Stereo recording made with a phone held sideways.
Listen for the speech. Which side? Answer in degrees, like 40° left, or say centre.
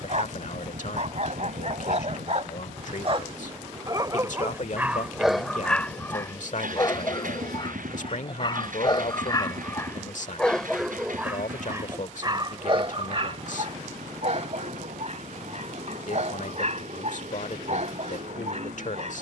70° left.